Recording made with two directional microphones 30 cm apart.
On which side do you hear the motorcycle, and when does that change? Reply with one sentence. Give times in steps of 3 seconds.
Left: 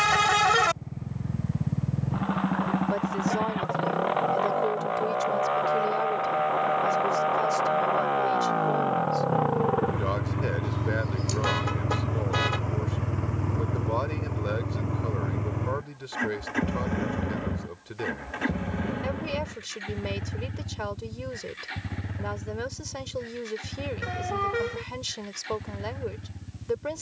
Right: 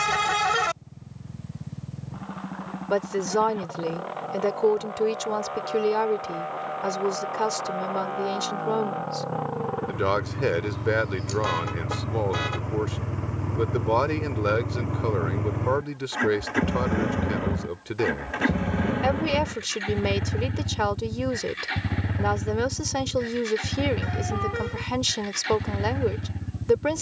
You can hear the motorcycle on the left from 0 s, in the centre from 12 s and on the right from 15 s.